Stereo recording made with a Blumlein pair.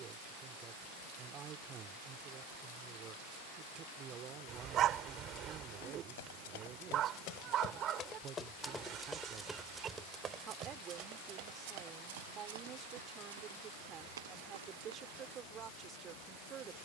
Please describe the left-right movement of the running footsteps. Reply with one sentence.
You can hear the running footsteps go from the left side to the right.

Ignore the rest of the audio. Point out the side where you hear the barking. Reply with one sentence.
In this clip you hear the barking on the right.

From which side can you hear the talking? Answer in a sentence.
You can hear the talking on the right.